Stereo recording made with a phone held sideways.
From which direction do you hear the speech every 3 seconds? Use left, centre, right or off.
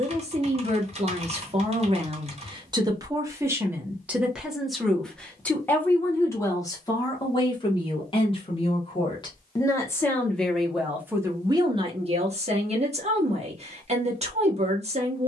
right, centre, left, centre, right.